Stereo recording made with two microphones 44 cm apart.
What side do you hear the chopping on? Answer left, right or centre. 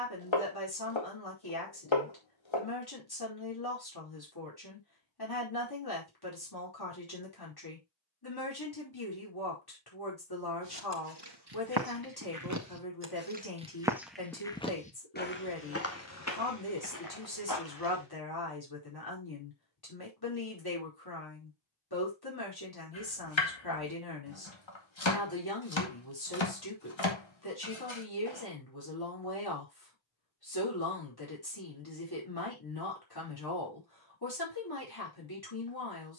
left.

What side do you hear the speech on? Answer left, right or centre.
left.